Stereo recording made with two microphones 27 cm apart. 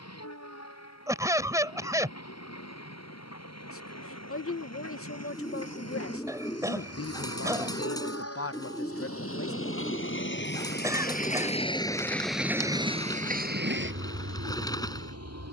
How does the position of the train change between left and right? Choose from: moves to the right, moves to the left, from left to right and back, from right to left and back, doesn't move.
moves to the right.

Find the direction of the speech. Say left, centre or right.
left.